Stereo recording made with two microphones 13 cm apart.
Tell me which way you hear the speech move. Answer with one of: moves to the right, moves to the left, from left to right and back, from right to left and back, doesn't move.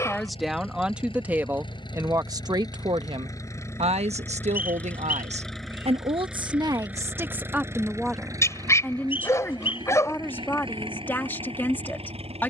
from left to right and back.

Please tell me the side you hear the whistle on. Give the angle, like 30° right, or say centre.
40° left.